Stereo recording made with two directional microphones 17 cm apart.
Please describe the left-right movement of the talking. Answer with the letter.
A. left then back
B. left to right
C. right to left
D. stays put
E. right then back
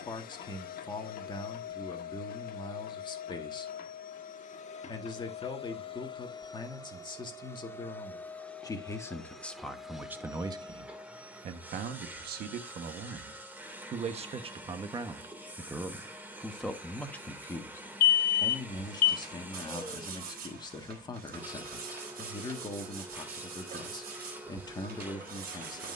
E.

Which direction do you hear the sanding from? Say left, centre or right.
right.